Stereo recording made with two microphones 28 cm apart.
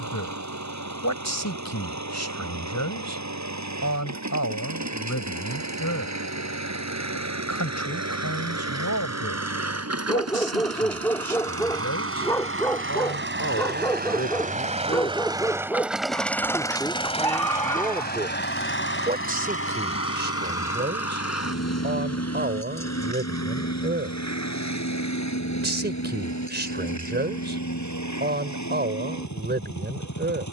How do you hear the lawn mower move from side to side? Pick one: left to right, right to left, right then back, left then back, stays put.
right to left.